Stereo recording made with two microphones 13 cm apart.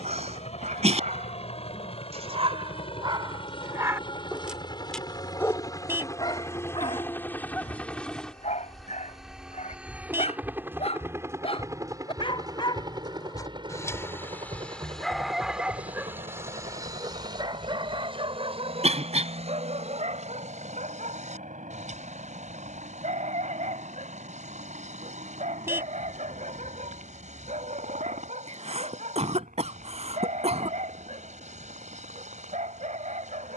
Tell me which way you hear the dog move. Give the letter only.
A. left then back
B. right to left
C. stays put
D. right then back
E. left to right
A.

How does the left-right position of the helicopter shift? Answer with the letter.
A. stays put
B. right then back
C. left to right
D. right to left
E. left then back
C.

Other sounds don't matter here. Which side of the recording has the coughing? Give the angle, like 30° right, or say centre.
50° right.